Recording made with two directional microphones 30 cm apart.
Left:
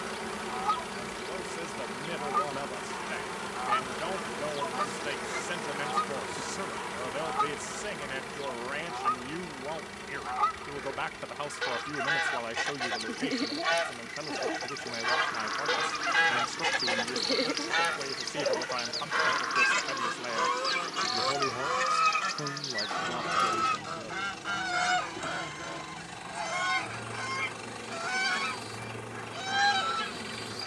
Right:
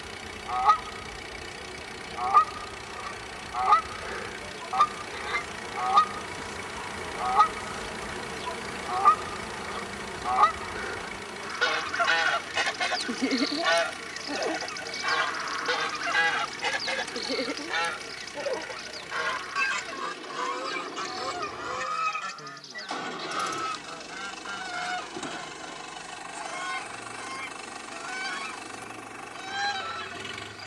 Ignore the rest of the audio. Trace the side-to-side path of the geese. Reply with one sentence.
In this clip you hear the geese travel towards the left.